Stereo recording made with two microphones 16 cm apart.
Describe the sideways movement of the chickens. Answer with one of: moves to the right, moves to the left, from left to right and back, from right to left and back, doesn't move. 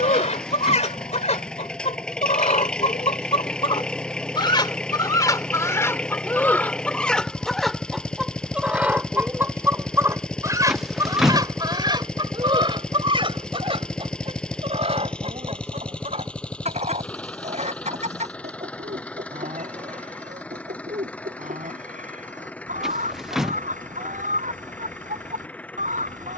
moves to the right.